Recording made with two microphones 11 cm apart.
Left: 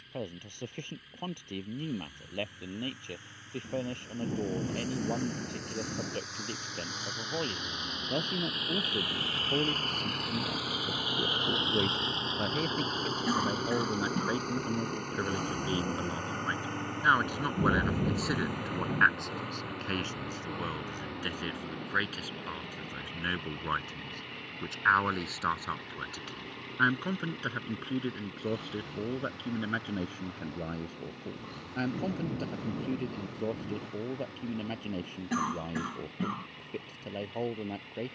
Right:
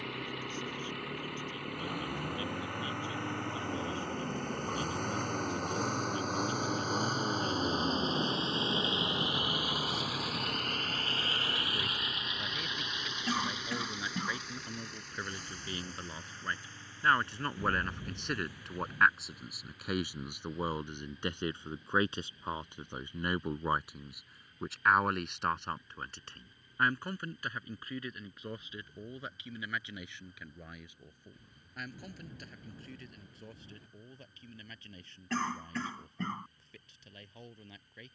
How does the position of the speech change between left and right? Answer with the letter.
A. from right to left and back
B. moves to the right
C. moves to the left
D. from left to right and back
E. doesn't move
D.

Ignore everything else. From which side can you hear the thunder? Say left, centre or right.
left.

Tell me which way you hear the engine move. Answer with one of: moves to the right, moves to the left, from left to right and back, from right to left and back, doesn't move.
moves to the left.